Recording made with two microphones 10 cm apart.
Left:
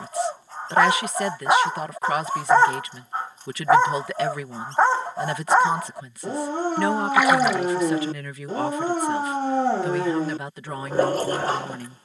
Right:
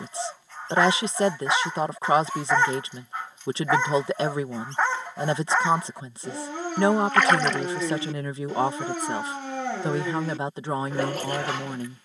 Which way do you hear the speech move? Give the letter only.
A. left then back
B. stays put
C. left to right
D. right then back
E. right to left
B.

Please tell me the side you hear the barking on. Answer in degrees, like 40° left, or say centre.
40° left.